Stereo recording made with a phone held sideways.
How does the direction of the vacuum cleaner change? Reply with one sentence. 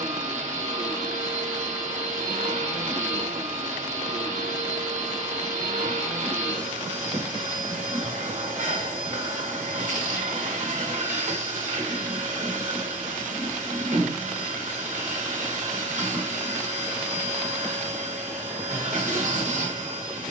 You can hear the vacuum cleaner stay in one place.